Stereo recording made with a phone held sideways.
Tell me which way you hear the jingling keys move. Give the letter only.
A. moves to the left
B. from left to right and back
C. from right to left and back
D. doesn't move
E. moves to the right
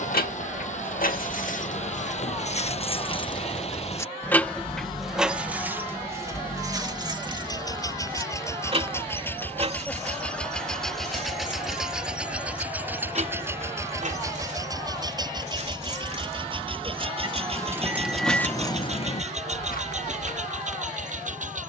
B.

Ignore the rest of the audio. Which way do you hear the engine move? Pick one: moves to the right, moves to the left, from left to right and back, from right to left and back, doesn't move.
moves to the right.